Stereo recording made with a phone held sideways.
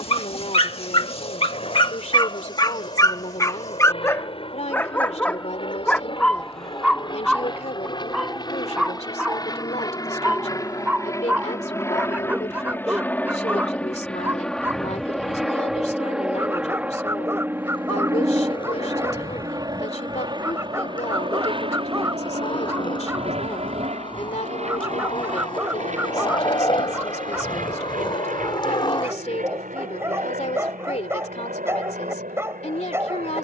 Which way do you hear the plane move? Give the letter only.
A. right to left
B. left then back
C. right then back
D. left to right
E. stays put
D.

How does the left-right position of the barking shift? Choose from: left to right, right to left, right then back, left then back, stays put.
left to right.